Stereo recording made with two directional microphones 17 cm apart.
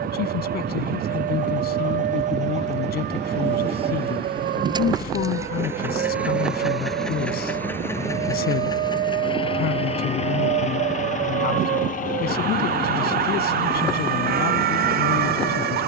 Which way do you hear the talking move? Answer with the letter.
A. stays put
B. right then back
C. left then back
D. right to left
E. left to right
A.